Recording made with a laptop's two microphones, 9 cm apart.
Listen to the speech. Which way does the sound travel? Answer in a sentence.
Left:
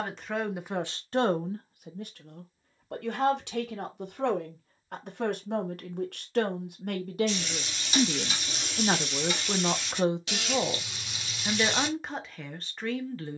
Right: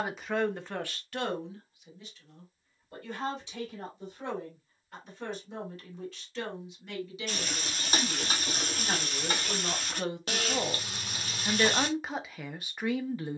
In this clip you hear the speech move from right to left and back again.